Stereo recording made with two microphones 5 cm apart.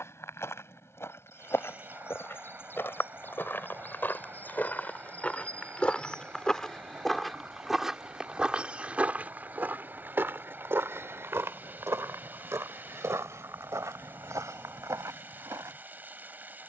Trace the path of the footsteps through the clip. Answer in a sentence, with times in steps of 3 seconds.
You can hear the footsteps on the left from 0 s, in the centre from 6 s and on the right from 9 s.